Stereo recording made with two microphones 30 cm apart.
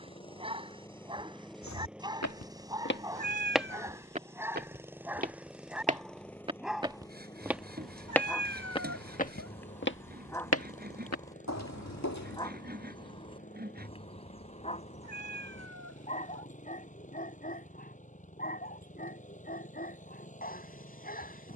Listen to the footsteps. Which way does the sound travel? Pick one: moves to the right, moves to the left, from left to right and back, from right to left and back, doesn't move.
from left to right and back.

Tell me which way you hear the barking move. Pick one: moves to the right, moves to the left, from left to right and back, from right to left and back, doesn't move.
moves to the left.